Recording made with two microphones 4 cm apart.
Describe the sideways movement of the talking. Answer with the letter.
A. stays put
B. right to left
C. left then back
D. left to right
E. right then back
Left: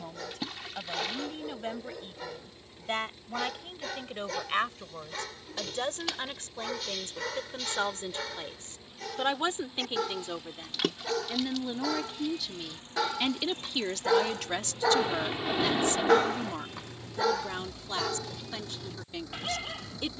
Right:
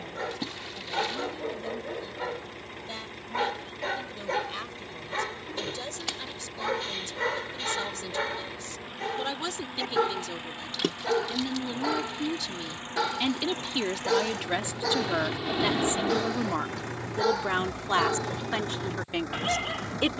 D.